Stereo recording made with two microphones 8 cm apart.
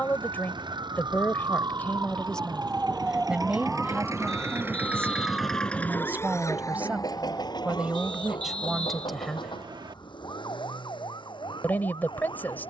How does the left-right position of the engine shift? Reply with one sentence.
In this clip you hear the engine go from the right side to the left.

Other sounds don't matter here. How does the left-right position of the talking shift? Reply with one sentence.
You can hear the talking go right and come back.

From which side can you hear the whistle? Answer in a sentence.
You can hear the whistle on the right.